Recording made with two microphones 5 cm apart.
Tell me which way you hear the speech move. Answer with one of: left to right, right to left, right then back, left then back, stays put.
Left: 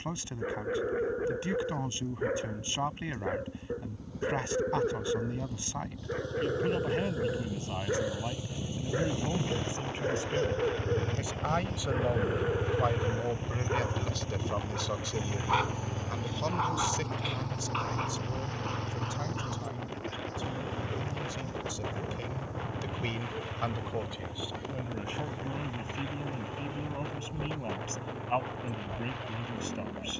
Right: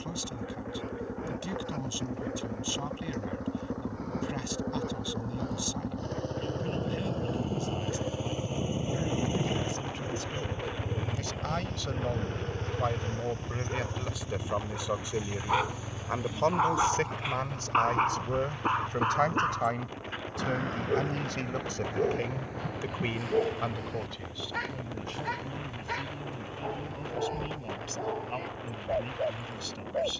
right then back.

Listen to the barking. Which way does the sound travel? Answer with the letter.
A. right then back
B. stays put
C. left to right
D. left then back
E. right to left
C.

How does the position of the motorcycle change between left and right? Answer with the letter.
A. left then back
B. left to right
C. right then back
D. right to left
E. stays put
D.